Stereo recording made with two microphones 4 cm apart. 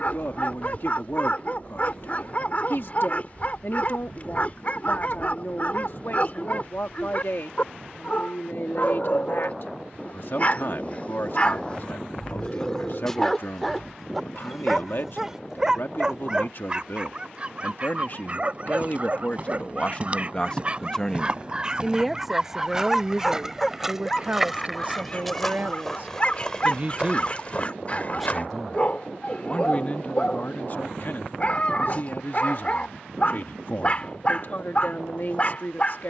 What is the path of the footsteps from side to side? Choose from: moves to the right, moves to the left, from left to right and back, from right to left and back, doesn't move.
moves to the left.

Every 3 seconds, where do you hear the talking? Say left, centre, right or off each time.
left, left, left, left, left, left, left, centre, right, centre, left, left.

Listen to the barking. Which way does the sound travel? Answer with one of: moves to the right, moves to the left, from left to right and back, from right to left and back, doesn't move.
from left to right and back.